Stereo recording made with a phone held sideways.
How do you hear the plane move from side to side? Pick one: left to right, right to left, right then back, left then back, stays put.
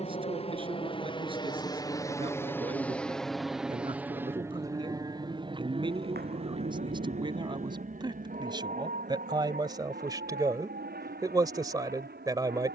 left to right.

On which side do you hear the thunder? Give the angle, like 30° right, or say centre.
80° right.